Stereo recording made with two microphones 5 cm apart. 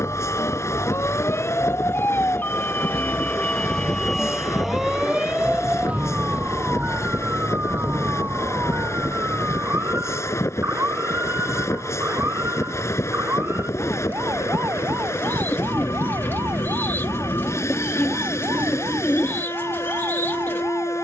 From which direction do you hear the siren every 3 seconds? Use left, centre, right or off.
left, centre, right, right, right, right, right.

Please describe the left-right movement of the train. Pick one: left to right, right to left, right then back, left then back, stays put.
stays put.